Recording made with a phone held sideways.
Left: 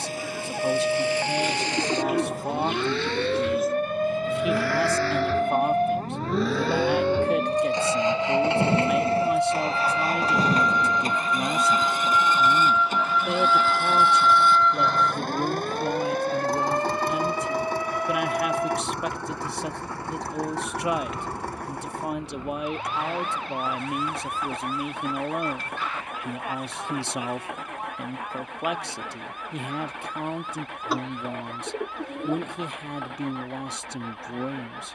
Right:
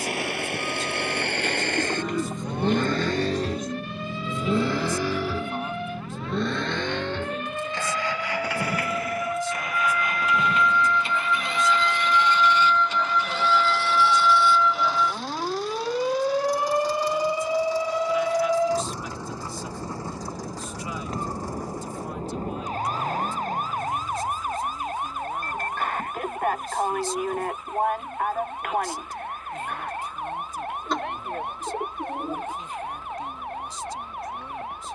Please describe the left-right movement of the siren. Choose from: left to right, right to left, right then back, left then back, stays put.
left to right.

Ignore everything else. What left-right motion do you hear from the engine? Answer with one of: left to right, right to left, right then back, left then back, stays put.
right to left.